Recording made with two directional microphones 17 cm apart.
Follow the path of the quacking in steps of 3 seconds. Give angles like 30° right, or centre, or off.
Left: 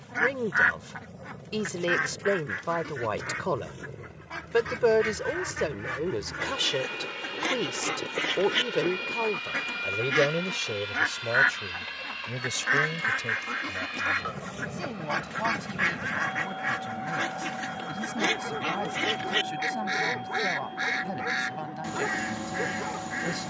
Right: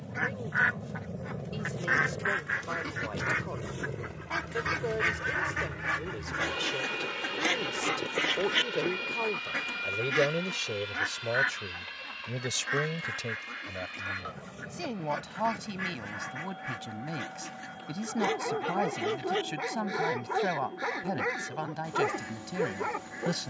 centre, 30° right, 10° right, 20° left, 50° left, 60° left, 60° left, 60° left.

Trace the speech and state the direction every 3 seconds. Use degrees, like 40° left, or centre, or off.
60° left, 60° left, 40° left, 10° left, 10° right, 20° right, 20° right, 20° right.